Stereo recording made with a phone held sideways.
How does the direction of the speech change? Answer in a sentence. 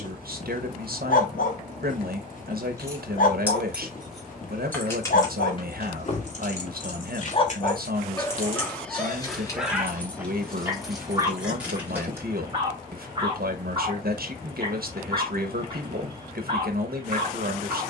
You can hear the speech stay put.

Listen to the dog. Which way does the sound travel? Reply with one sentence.
You can hear the dog travel towards the right.